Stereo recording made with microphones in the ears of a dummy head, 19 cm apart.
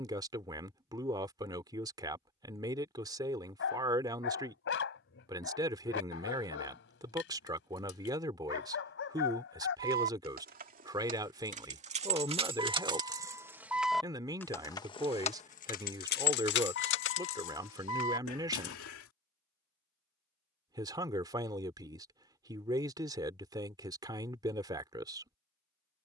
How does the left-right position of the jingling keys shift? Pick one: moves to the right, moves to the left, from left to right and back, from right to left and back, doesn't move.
moves to the left.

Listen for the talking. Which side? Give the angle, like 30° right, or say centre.
20° right.